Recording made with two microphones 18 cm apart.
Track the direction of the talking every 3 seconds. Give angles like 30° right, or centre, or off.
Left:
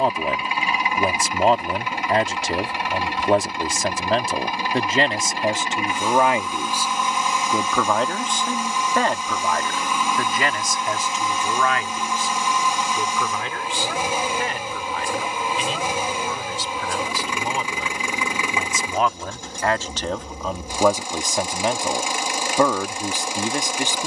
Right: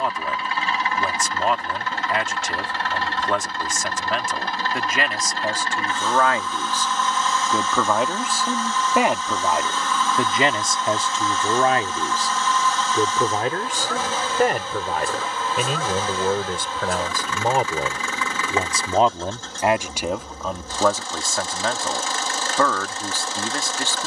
40° left, 30° left, centre, 30° right, 50° right, 50° right, 20° right, 20° left.